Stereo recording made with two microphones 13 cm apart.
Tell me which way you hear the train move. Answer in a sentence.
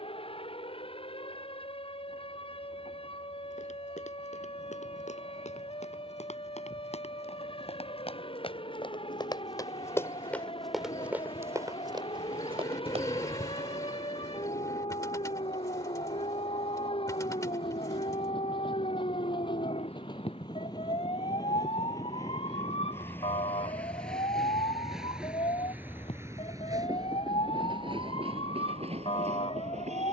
You can hear the train move to the right.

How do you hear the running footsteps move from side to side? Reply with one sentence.
You can hear the running footsteps move from left to right.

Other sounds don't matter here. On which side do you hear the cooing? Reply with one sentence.
You can hear the cooing on the left.